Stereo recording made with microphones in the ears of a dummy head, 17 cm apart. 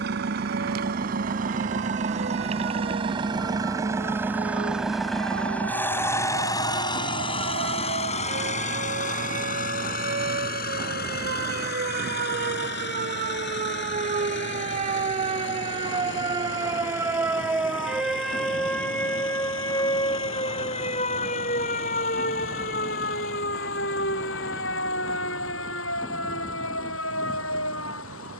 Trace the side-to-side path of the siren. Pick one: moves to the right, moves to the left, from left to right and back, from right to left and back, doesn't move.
moves to the left.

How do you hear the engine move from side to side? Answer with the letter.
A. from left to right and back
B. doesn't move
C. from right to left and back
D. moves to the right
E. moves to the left
E.